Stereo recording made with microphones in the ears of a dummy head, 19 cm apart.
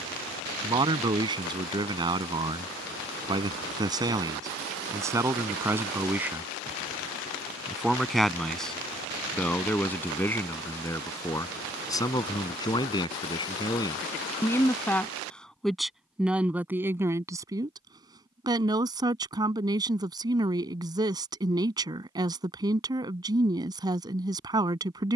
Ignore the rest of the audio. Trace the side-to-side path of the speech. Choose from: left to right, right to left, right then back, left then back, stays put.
left then back.